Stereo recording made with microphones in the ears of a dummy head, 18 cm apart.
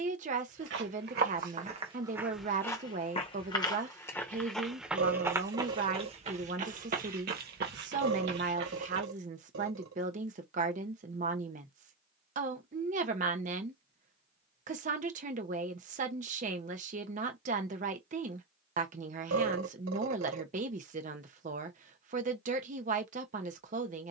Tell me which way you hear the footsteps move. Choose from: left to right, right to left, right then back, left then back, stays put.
left then back.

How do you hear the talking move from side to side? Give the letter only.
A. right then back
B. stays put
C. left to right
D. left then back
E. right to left
B.